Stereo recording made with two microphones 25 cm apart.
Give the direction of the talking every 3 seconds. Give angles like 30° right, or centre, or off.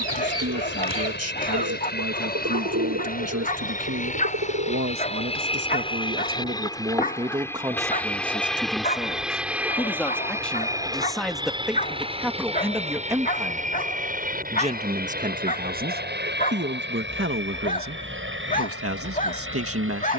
70° right, 60° right, 20° right, centre, 20° right, 40° right, 60° right.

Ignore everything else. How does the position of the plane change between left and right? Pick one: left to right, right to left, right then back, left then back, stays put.
left to right.